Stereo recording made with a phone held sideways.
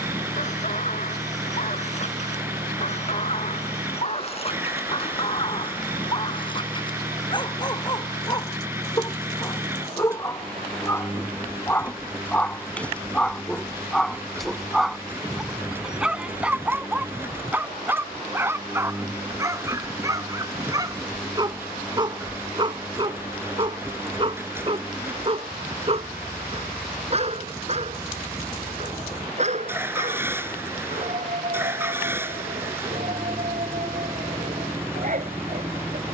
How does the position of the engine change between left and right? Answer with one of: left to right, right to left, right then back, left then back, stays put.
stays put.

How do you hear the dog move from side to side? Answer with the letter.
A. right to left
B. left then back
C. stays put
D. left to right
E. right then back
D.